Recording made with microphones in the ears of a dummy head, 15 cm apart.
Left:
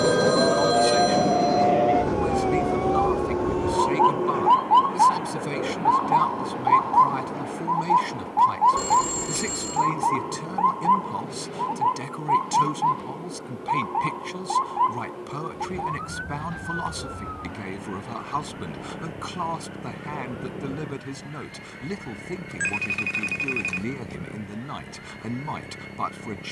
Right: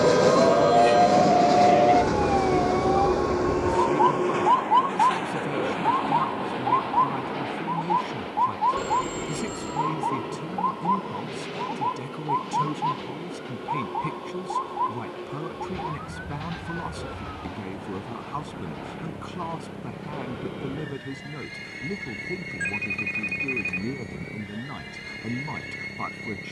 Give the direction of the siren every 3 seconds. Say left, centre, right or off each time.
right, centre, left, left, left, left, left, left, left.